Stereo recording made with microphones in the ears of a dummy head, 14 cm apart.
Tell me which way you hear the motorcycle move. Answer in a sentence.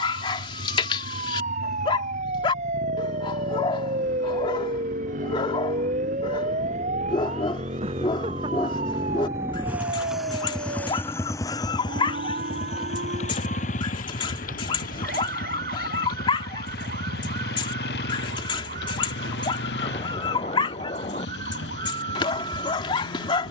You can hear the motorcycle go from the right side to the left.